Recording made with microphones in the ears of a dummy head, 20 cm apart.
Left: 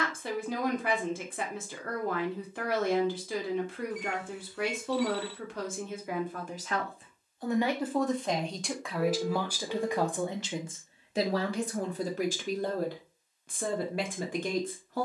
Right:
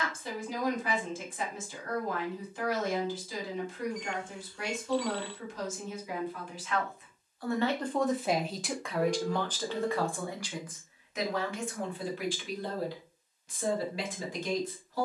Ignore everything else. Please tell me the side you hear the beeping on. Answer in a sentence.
In this clip you hear the beeping in the centre.